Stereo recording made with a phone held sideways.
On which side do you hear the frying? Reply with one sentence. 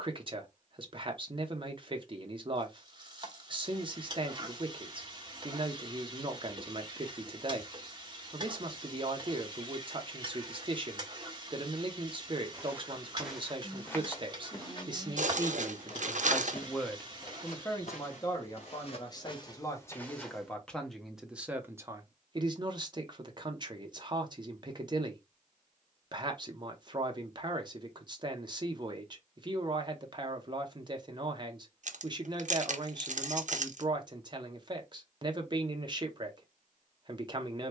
You can hear the frying on the right.